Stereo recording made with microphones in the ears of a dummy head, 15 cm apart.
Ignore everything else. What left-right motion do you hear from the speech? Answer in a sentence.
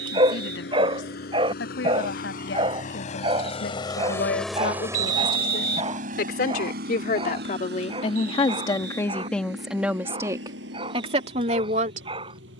In this clip you hear the speech move to the right.